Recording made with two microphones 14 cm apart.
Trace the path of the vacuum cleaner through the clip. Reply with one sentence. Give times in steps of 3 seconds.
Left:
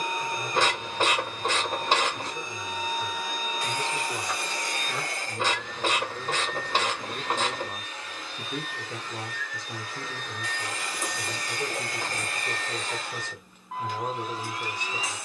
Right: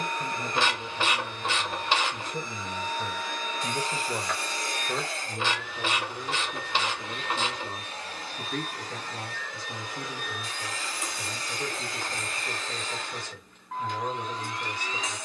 You can hear the vacuum cleaner in the centre from 0 s, on the right from 6 s and in the centre from 9 s.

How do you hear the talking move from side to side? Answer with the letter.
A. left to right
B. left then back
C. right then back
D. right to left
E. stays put
D.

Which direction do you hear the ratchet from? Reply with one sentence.
In this clip you hear the ratchet on the left.